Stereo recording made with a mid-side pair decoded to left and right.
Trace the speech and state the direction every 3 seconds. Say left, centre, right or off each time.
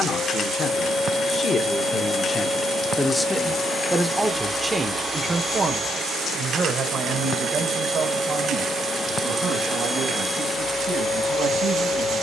left, centre, right, right.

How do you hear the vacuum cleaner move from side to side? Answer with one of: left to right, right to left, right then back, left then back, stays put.
right then back.